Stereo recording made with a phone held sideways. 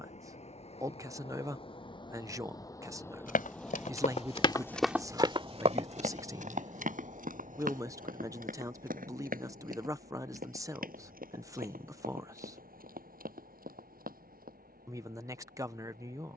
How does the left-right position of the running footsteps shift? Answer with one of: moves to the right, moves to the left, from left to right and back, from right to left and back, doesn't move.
moves to the right.